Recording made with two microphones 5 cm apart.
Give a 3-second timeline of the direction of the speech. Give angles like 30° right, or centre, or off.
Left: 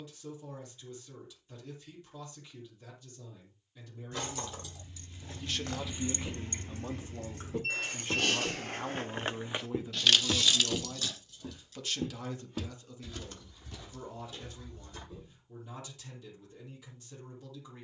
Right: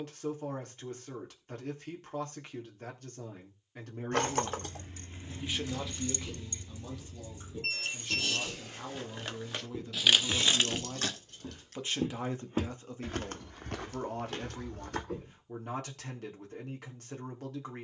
60° right, 40° right, 30° left, centre, 50° right, 60° right.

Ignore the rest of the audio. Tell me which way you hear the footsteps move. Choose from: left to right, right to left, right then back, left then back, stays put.
left to right.